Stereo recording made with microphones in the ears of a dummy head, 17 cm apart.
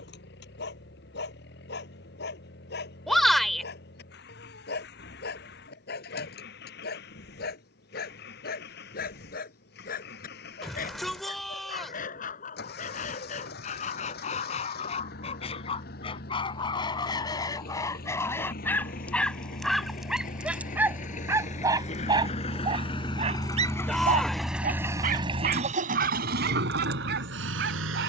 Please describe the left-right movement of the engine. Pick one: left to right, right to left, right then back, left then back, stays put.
left to right.